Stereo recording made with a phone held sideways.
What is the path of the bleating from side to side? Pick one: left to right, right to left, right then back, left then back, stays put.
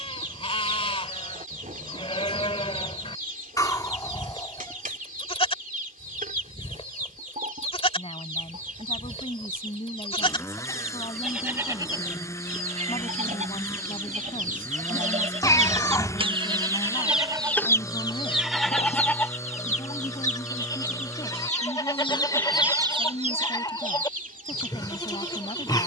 right then back.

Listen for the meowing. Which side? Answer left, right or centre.
left.